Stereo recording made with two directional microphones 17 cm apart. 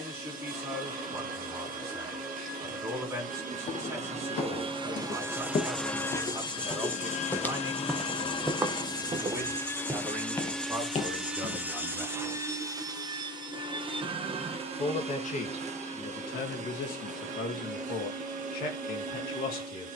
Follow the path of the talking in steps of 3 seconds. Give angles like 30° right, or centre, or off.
20° right, 20° right, 20° right, 10° right, 20° left, 60° left, 60° left.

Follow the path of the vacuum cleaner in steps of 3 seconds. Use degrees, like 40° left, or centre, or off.
50° right, 30° right, 30° left, centre, 30° right, 40° right, 50° right.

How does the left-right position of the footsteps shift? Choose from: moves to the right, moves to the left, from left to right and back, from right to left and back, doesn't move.
from left to right and back.